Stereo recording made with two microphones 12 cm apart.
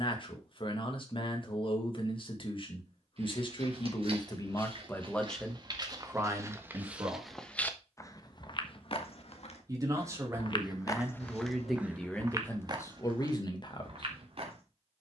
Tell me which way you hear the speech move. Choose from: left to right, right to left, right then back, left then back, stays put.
right then back.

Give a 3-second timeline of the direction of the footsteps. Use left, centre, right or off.
off, right, centre, left, right.